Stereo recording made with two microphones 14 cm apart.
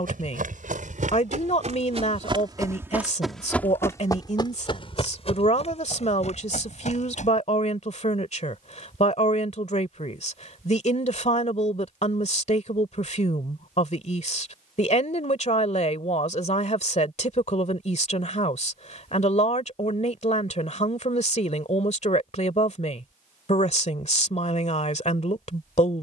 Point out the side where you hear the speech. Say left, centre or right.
left.